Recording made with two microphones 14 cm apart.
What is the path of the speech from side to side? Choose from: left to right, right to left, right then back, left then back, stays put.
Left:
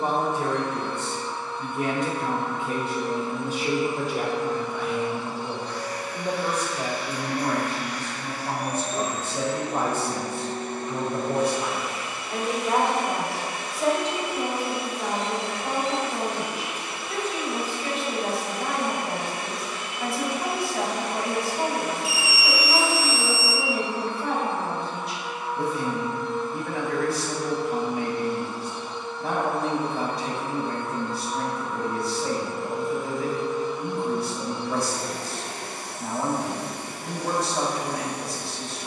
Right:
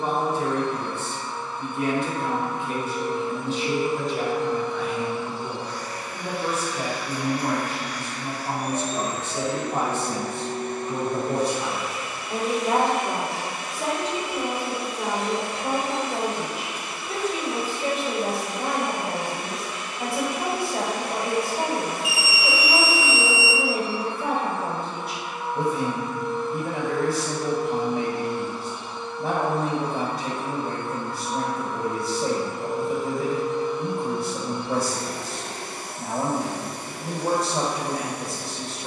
left to right.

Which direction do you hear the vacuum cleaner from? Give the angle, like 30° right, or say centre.
40° right.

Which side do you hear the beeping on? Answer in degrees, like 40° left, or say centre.
20° right.